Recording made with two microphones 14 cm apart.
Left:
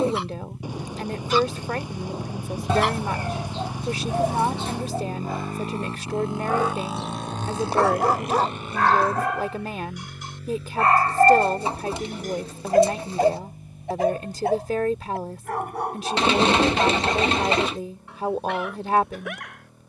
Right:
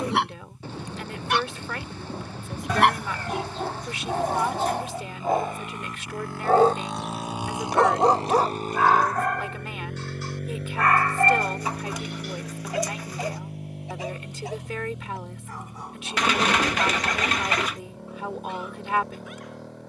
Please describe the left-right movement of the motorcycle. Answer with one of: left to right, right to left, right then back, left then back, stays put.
left to right.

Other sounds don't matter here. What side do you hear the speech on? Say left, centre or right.
left.